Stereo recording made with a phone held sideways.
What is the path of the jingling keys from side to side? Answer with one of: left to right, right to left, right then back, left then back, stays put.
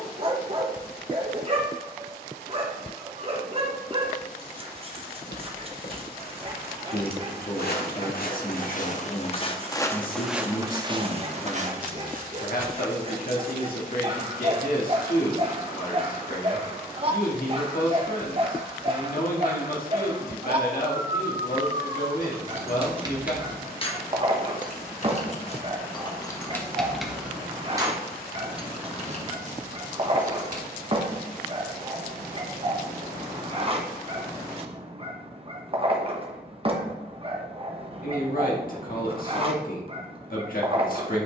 left then back.